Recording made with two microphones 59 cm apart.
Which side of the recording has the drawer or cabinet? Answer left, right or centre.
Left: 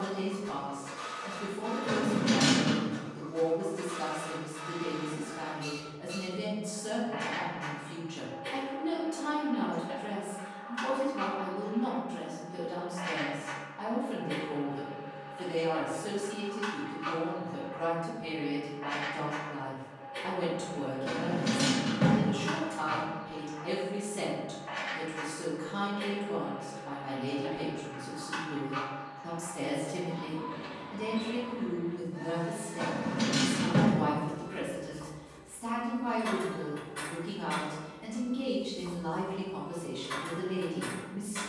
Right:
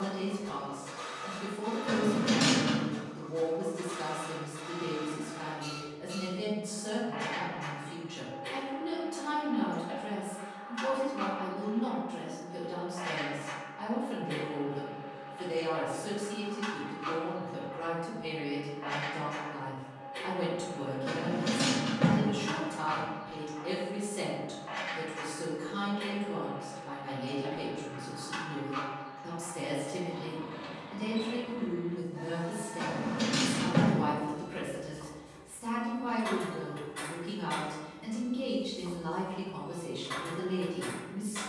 left.